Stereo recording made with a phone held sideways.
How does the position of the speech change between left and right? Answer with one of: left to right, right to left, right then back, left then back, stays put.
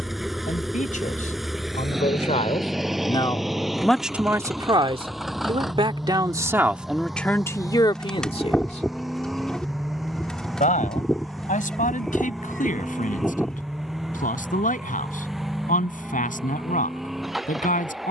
right then back.